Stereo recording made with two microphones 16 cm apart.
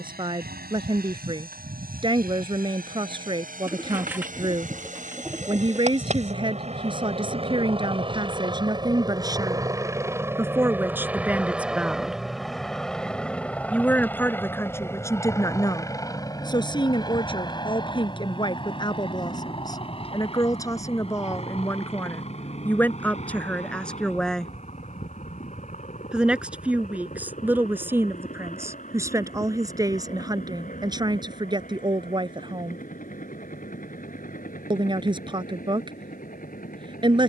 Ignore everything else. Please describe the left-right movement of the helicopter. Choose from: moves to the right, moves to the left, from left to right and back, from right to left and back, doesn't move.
moves to the left.